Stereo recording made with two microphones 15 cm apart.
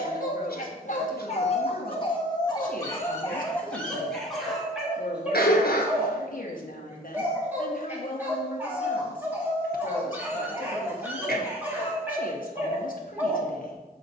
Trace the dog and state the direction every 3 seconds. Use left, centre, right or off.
left, centre, centre, centre, centre.